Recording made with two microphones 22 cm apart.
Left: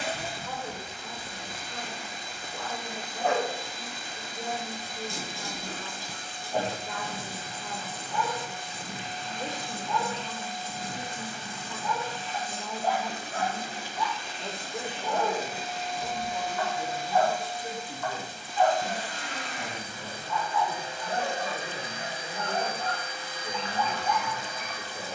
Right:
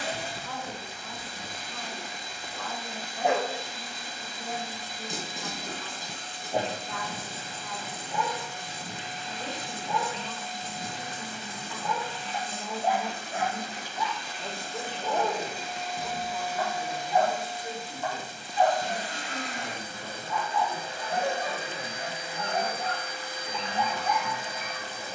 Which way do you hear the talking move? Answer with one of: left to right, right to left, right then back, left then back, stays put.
right then back.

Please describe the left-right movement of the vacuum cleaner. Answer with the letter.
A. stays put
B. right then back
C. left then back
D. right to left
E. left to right
E.